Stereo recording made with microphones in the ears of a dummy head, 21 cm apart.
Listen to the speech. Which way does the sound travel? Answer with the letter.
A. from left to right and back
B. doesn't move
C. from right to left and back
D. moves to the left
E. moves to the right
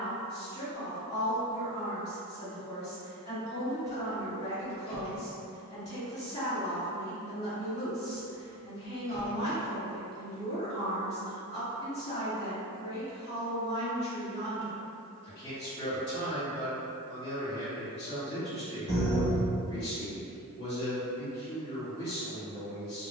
B.